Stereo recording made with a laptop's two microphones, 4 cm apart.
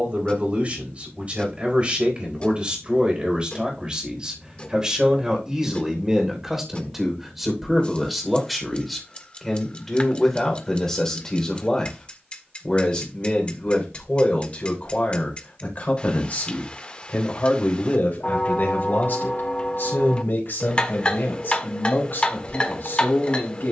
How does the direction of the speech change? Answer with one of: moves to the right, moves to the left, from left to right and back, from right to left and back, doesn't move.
moves to the left.